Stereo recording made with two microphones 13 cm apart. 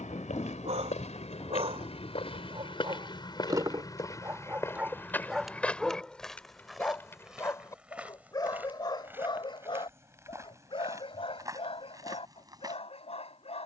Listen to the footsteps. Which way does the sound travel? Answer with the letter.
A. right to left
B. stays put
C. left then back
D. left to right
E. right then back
D.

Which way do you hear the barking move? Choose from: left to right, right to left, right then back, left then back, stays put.
right to left.